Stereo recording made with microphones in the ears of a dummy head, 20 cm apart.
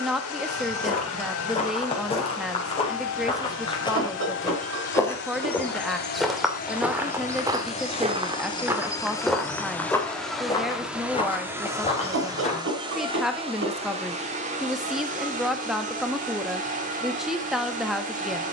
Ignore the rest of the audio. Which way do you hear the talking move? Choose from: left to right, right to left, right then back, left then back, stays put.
stays put.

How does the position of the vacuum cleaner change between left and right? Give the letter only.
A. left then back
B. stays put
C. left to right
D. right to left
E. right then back
C.